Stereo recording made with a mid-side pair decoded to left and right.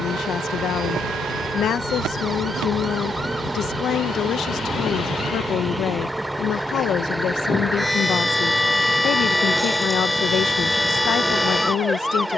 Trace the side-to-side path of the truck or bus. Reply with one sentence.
You can hear the truck or bus stay in one place.